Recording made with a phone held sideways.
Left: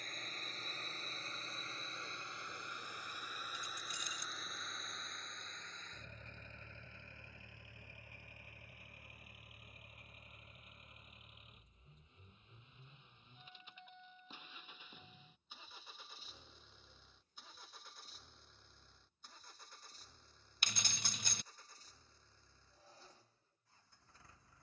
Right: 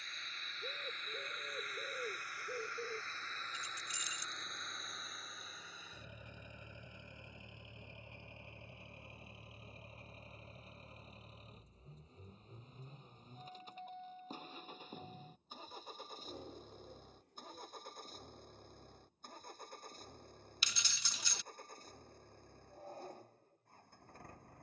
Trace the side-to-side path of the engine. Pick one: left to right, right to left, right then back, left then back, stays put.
left to right.